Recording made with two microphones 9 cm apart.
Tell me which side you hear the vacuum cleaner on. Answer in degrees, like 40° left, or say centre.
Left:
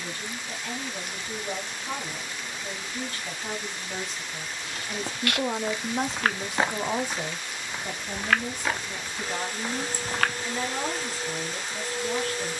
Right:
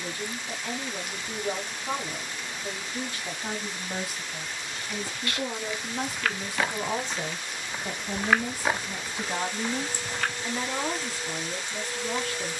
40° left.